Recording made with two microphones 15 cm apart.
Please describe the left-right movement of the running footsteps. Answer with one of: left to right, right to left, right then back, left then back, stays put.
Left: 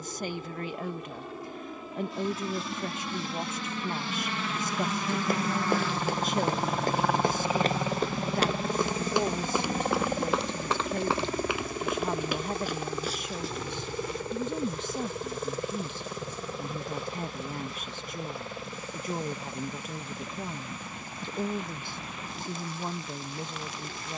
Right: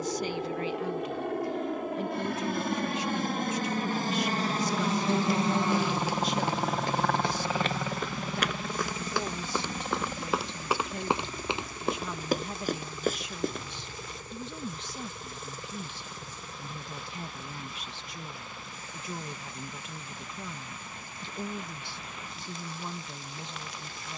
left to right.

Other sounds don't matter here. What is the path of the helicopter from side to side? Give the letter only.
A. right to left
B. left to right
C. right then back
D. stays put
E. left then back
A.